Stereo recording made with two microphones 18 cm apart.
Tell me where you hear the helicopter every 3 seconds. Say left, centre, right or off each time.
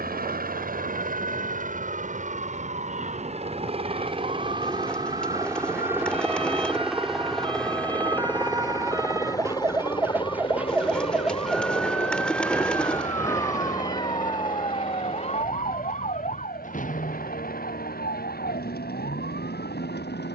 right, right, centre, left, left, left, left.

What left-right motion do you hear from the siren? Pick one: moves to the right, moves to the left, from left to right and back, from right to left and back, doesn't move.
moves to the left.